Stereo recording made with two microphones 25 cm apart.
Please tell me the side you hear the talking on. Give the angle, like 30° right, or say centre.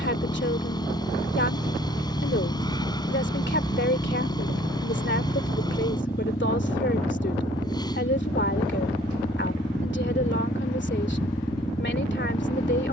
50° left.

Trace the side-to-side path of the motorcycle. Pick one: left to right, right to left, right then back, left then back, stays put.
stays put.